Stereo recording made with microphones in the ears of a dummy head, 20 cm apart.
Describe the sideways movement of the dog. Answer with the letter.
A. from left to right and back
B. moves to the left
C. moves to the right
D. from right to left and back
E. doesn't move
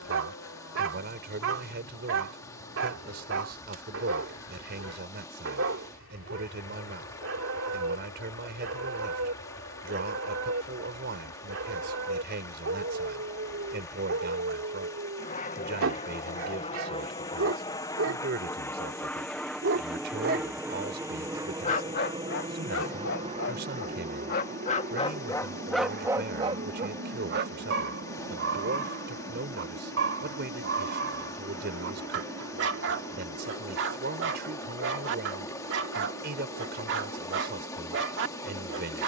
D.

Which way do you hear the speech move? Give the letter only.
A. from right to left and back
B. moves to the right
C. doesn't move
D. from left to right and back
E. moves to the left
C.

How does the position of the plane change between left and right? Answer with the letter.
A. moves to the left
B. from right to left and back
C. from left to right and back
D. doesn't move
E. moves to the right
E.